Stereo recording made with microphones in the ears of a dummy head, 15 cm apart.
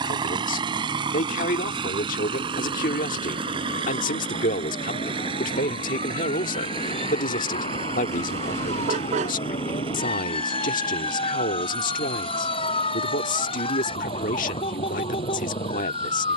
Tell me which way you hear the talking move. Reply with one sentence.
You can hear the talking stay in one place.